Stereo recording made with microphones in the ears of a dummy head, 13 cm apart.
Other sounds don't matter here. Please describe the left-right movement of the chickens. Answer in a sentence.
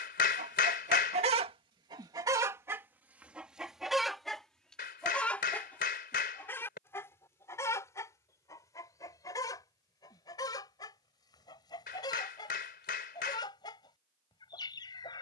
You can hear the chickens go from the right side to the left.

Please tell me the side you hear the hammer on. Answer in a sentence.
You can hear the hammer on the left.